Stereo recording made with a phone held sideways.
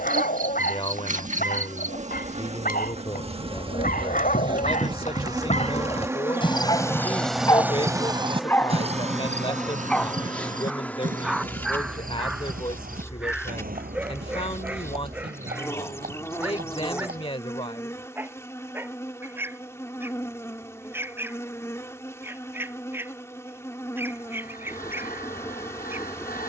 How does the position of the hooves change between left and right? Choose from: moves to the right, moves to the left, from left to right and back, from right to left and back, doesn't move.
moves to the right.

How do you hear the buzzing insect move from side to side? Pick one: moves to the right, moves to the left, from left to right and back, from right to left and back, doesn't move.
moves to the left.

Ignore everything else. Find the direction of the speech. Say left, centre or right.
left.